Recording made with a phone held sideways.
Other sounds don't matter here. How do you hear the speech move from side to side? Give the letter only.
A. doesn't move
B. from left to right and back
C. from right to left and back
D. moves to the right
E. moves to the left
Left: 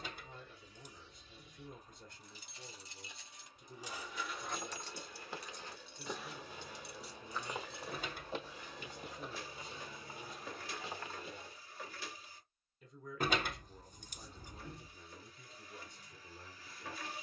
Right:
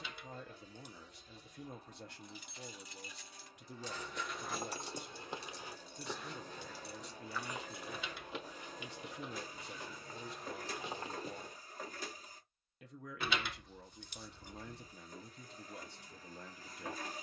A.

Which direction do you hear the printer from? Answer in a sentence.
In this clip you hear the printer on the right.